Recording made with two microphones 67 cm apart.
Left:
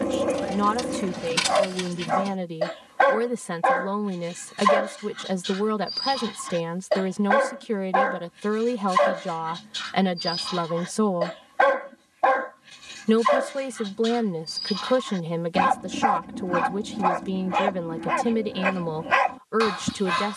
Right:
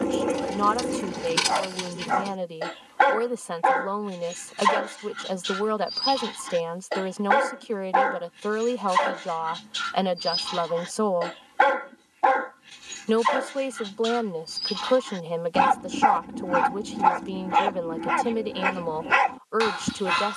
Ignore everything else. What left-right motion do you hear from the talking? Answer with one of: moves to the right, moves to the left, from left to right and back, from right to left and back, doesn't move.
doesn't move.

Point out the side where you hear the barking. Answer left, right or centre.
centre.